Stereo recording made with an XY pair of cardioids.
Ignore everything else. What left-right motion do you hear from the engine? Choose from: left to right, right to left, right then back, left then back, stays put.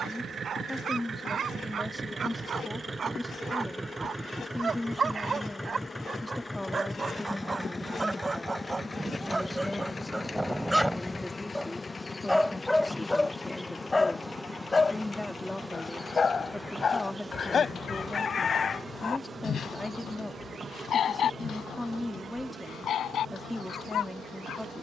right to left.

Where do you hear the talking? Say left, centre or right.
centre.